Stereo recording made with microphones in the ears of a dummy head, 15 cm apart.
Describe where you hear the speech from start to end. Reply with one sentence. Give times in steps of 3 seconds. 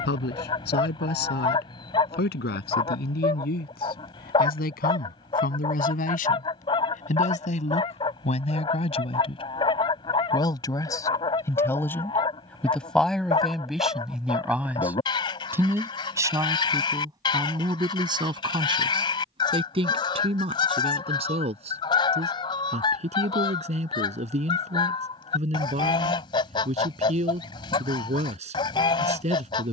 In this clip you hear the speech on the left from 0 s, in the centre from 12 s and on the right from 15 s.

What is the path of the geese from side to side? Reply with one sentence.
You can hear the geese stay put.